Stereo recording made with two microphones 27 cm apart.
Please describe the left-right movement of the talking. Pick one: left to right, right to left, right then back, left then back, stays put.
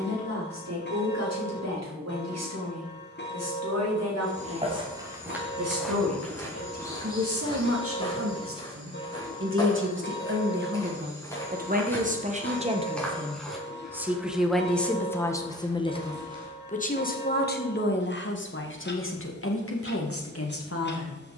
right to left.